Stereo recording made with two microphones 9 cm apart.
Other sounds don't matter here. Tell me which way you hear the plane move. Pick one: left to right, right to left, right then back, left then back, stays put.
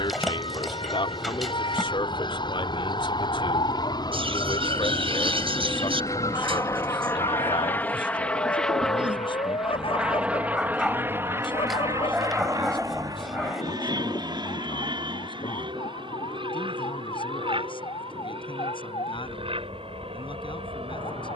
left to right.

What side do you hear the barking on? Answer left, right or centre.
centre.